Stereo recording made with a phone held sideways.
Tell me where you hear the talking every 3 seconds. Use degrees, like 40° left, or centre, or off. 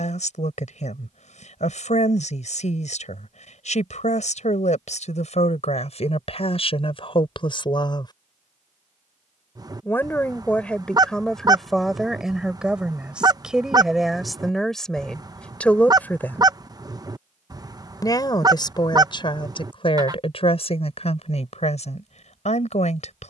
60° left, 60° left, 40° left, 10° left, centre, 10° left, 40° left, 50° left.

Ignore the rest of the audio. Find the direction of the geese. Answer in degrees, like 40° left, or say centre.
30° right.